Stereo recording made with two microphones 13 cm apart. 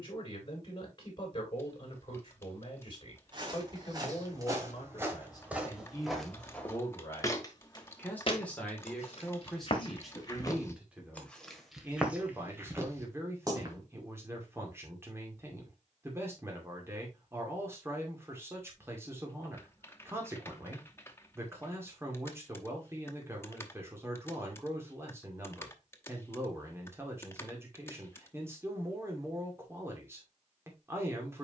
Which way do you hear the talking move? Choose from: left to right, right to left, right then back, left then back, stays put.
left to right.